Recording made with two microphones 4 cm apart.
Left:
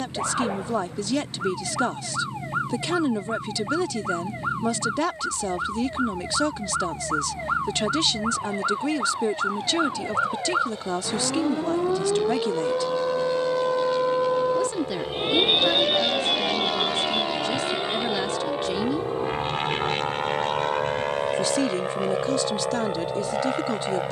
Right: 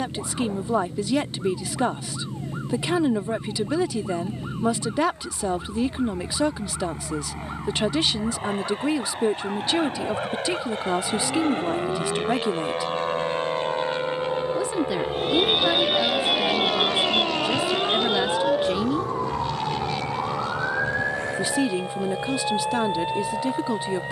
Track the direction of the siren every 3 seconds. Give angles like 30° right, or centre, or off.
80° left, 80° left, 80° left, 70° left, 60° left, 10° right, 60° right, 80° right.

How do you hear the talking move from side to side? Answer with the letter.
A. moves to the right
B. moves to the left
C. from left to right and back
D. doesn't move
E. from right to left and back
D.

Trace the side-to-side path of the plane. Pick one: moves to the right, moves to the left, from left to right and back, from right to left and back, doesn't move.
moves to the left.